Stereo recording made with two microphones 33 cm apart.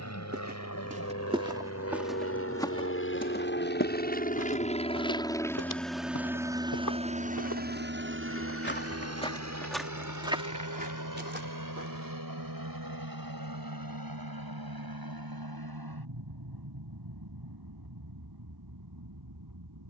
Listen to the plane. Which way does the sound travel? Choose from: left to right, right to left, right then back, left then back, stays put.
left to right.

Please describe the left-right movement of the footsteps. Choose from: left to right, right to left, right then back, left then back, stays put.
left then back.